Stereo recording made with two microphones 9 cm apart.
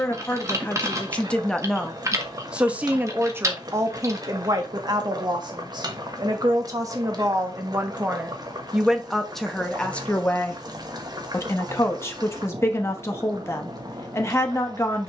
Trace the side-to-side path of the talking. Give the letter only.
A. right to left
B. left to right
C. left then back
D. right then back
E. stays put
D.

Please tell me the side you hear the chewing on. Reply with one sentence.
In this clip you hear the chewing on the right.